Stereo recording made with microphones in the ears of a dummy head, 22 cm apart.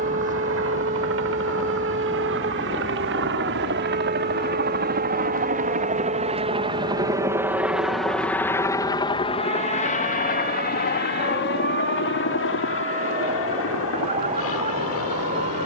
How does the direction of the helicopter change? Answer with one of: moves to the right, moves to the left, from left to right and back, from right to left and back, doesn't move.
moves to the left.